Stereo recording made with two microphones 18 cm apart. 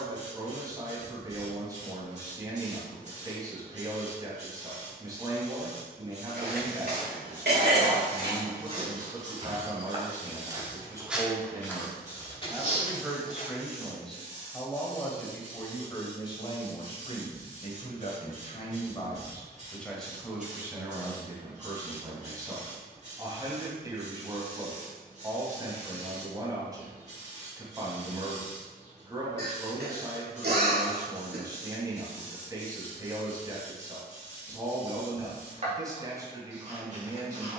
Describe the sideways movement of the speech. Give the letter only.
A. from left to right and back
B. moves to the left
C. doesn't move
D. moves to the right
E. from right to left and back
E.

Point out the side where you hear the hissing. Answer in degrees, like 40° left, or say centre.
40° right.